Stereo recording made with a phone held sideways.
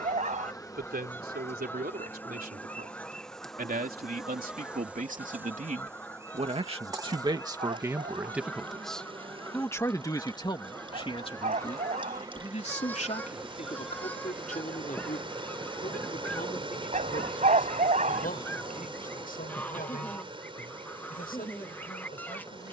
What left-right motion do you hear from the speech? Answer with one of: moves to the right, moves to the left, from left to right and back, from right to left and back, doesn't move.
moves to the left.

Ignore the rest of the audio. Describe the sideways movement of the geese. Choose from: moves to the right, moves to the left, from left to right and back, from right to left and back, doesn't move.
doesn't move.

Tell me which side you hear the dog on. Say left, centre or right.
right.